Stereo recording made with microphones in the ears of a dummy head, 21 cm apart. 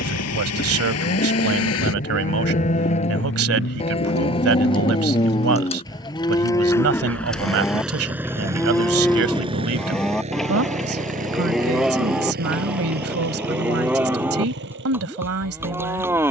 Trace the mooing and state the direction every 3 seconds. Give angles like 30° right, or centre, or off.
40° left, 20° left, 10° left, centre, 10° right, 10° right.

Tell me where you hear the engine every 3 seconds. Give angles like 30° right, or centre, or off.
70° left, 40° left, centre, 30° right, 50° right, 50° right.